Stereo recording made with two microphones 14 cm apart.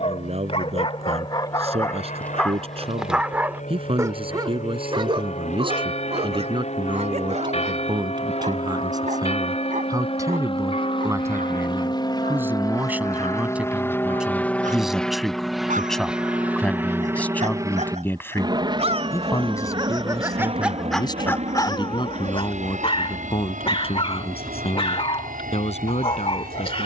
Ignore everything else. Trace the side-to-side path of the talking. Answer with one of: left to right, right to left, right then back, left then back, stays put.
right to left.